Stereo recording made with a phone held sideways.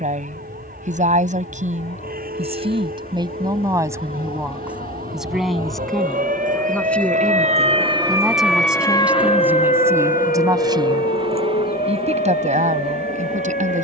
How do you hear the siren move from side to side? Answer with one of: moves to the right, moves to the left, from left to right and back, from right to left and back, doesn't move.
moves to the left.